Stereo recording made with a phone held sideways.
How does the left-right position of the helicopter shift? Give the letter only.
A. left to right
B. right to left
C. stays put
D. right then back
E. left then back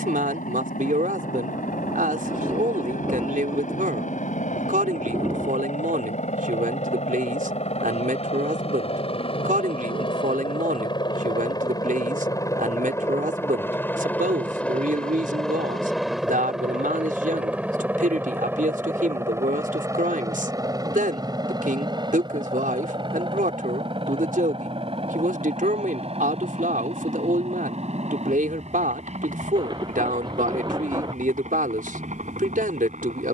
A.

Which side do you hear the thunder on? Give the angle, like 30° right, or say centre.
30° right.